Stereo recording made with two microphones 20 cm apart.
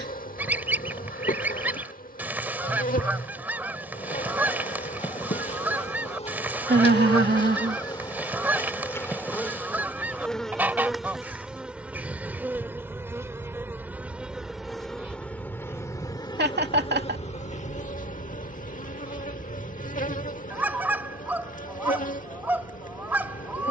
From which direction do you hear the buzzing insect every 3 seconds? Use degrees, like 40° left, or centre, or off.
50° left, 40° left, 20° left, centre, 10° right, 20° left, 40° left, 40° left.